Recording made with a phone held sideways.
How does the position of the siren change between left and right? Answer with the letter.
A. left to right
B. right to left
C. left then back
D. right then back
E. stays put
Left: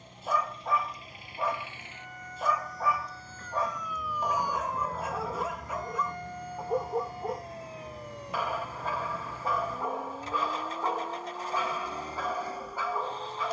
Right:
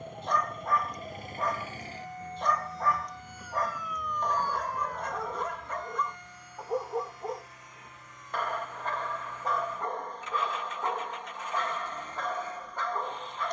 B.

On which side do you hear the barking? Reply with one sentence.
You can hear the barking in the centre.